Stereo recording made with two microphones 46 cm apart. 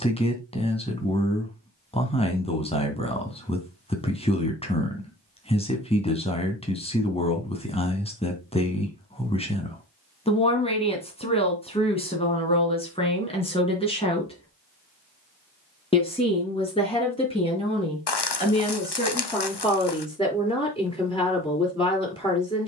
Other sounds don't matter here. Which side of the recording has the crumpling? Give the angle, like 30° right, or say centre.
60° left.